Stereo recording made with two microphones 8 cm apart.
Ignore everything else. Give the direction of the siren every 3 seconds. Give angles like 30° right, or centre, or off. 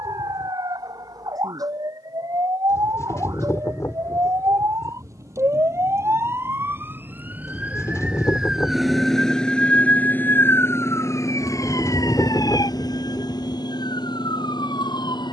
60° right, 50° right, 20° right, 30° left, 60° left.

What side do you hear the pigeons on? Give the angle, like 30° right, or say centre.
40° left.